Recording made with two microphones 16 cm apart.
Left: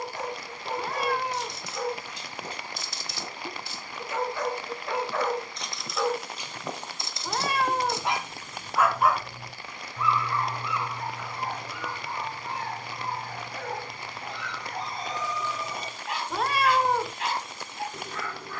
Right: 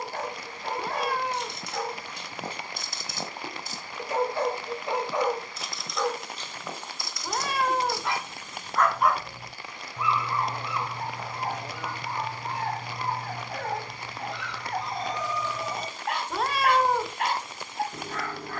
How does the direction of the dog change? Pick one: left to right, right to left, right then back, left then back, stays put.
left then back.